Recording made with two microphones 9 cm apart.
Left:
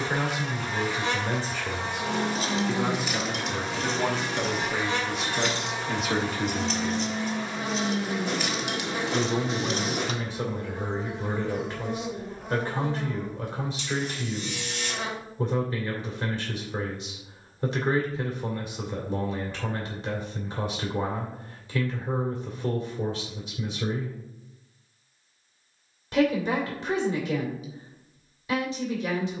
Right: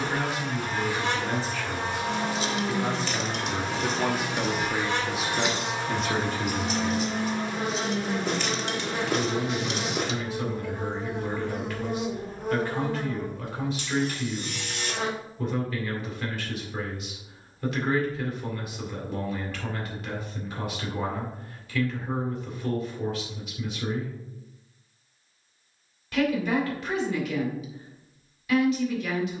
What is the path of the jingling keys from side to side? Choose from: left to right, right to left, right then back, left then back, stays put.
right then back.